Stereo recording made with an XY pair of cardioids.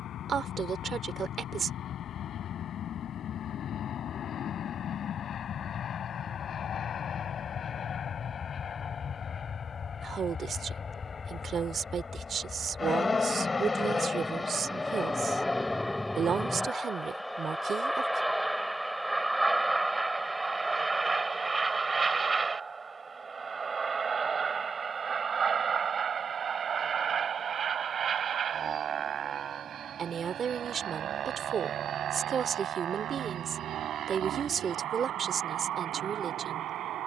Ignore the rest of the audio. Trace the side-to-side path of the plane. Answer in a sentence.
In this clip you hear the plane go from the left side to the right.